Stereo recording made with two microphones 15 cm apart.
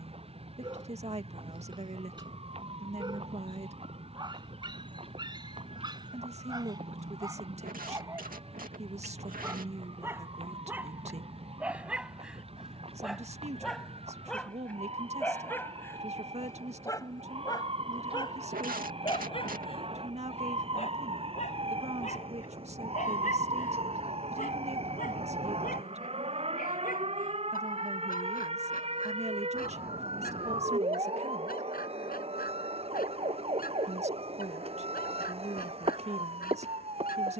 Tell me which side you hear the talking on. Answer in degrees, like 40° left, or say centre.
50° right.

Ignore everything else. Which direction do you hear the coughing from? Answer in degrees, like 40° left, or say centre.
80° right.